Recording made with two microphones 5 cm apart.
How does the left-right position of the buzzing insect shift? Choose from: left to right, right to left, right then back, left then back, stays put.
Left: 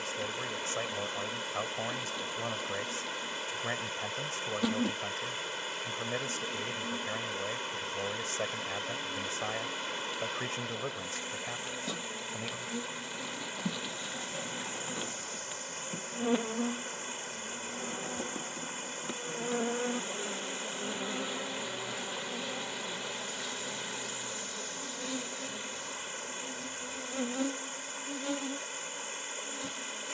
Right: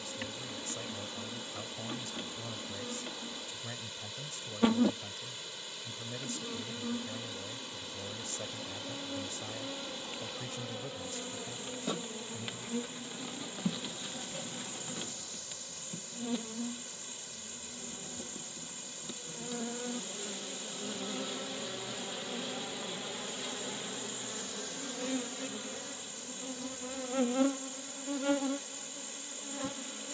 left then back.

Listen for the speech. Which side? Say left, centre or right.
left.